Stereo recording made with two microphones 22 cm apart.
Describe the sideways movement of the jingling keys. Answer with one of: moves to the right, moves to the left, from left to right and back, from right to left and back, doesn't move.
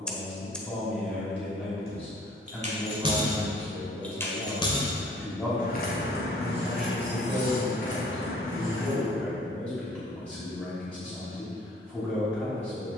moves to the left.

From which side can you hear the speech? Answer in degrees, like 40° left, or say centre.
centre.